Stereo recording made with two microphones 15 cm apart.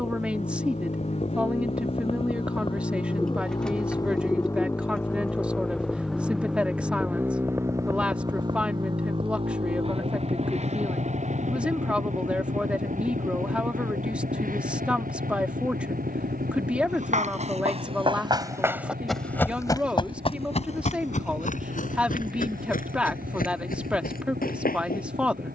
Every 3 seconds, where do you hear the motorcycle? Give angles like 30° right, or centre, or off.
40° left, 20° left, 20° right, 50° right, 60° right, 70° right, 80° right, 80° right, 80° right.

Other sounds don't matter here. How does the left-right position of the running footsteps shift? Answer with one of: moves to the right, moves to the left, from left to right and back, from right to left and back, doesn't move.
moves to the left.